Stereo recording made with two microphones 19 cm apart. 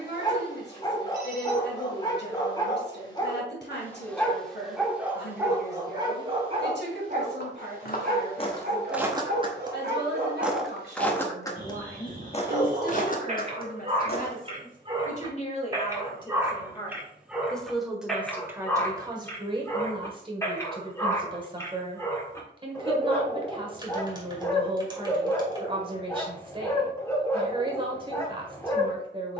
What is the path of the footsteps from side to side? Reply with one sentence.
You can hear the footsteps go right and come back.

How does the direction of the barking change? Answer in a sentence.
You can hear the barking go right and come back.